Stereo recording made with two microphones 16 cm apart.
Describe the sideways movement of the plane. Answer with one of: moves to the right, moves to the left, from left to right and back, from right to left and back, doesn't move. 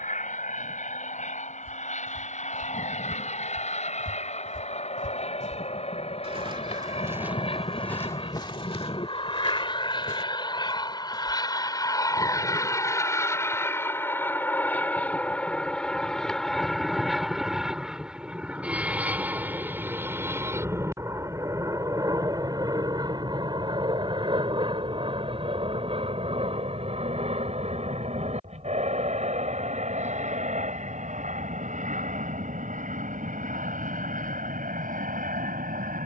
moves to the right.